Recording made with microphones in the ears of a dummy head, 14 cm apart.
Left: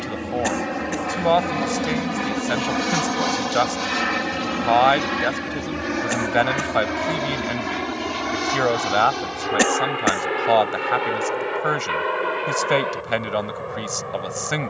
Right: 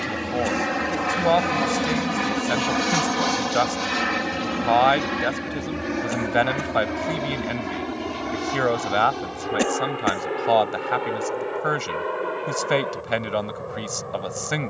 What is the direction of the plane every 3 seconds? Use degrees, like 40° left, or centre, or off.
20° right, 10° left, 30° left, 40° left, 50° left.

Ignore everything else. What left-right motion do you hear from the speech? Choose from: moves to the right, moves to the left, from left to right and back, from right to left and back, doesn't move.
doesn't move.